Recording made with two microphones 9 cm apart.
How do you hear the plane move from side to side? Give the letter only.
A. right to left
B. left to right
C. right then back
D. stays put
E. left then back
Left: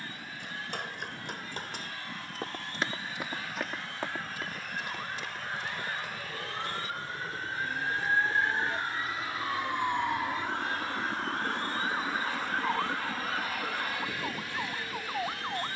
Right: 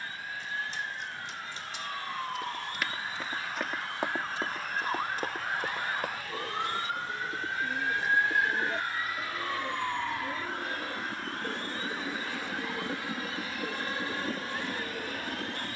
B.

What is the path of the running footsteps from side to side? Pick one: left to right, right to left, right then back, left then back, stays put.
left to right.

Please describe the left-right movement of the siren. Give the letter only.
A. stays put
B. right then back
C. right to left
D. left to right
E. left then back
C.